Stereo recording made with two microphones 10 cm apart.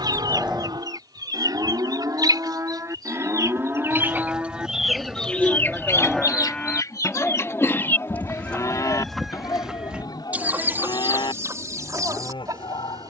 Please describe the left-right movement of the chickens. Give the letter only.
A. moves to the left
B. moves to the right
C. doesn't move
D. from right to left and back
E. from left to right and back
D.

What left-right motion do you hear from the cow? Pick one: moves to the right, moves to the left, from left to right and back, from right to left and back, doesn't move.
moves to the left.